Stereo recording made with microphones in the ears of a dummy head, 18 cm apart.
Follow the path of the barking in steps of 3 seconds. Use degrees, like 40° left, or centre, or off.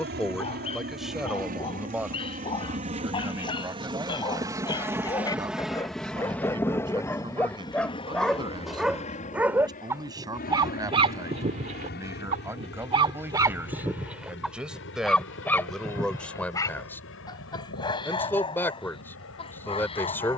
30° left, 20° left, 10° left, 20° right, 10° right, 20° left, 30° left.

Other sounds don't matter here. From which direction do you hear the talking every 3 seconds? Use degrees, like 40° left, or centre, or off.
centre, 20° right, 20° right, 20° right, 10° right, 10° left, 10° left.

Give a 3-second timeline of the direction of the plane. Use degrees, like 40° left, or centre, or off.
50° right, 20° right, 20° left, 40° left, 50° left, 60° left, 70° left.